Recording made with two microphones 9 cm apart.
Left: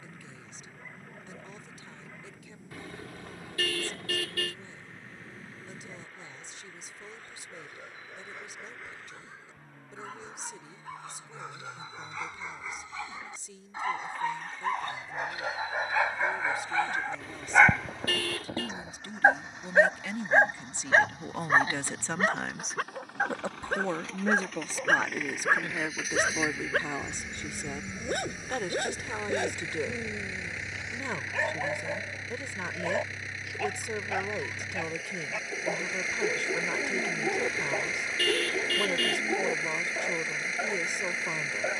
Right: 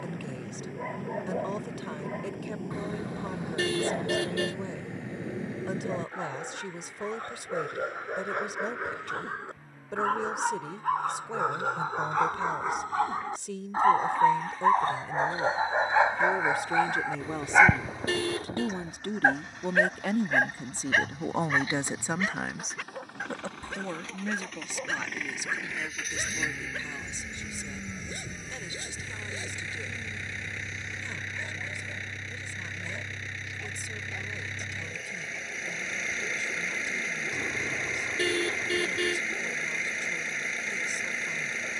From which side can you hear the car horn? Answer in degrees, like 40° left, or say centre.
20° right.